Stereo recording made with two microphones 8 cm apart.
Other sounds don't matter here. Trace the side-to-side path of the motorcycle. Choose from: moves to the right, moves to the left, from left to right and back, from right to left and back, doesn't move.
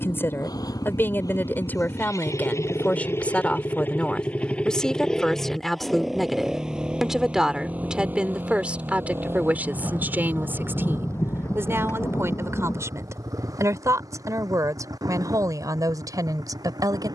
moves to the right.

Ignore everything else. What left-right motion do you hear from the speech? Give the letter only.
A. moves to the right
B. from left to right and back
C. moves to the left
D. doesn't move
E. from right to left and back
A.